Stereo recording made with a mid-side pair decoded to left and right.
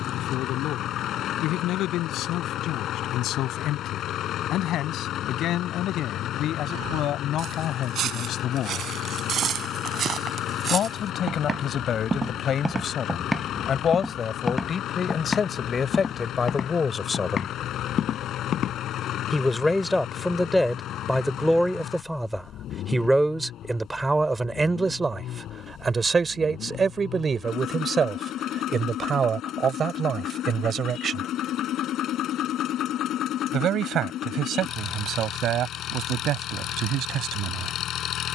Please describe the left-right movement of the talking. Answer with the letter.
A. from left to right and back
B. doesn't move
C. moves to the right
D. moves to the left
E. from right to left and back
C.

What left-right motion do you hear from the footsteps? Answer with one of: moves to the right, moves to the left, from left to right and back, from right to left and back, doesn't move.
moves to the left.